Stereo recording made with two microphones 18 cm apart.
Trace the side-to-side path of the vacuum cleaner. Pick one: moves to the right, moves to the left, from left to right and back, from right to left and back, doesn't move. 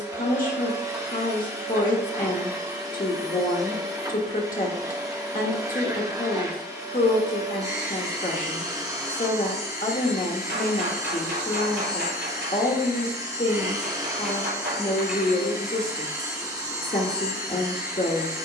doesn't move.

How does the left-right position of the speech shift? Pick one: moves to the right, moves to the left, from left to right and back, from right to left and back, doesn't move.
doesn't move.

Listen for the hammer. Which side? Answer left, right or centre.
right.